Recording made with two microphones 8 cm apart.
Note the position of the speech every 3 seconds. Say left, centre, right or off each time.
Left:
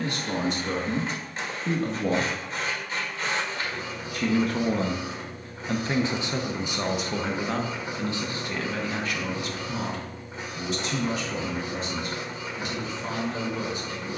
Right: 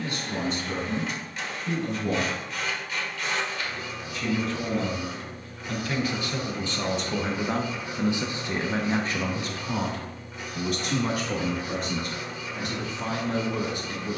left, left, centre, right, right.